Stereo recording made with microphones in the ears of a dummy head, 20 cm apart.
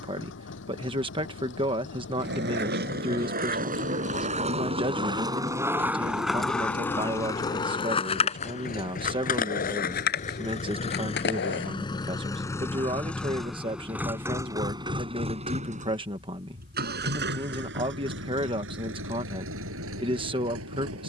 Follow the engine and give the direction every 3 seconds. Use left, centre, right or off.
left, left, left, left, centre, right, right.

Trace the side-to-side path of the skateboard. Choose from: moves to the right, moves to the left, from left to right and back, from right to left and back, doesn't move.
moves to the left.